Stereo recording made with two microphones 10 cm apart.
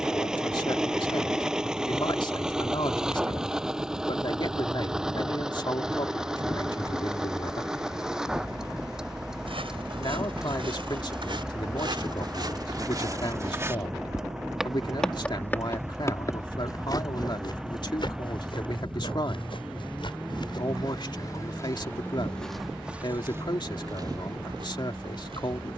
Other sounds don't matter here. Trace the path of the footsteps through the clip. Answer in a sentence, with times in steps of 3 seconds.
You can hear the footsteps not at all from 0 s, on the right from 9 s, on the left from 15 s, in the centre from 21 s and on the right from 24 s.